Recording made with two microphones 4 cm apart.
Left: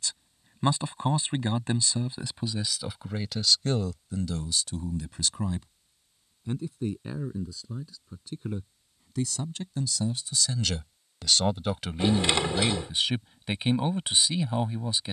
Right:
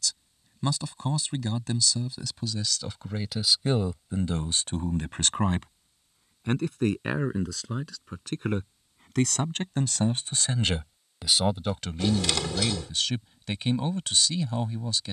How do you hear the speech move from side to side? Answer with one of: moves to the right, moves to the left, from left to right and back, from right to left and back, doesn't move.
from left to right and back.